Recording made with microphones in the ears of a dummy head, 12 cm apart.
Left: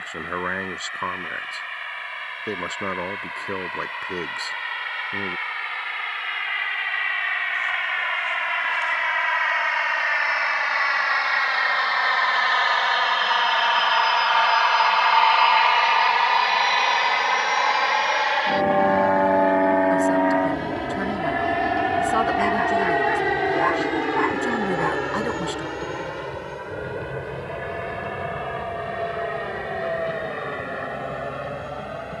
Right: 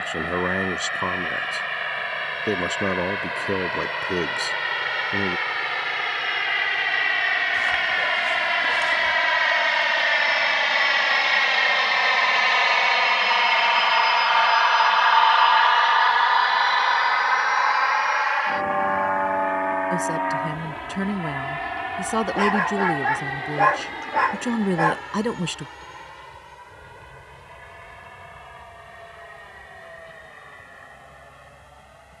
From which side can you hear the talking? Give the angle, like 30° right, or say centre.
20° right.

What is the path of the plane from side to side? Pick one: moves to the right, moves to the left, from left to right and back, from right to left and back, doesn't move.
moves to the left.